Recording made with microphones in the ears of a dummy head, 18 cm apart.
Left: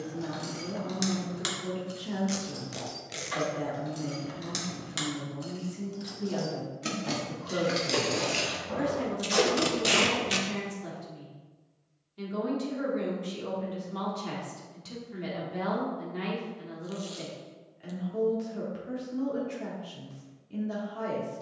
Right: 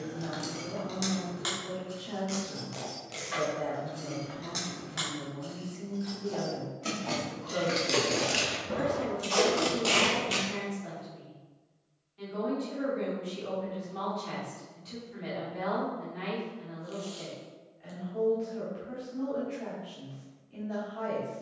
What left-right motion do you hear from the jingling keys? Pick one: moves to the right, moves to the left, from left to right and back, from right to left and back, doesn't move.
from right to left and back.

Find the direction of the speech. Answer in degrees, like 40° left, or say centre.
60° left.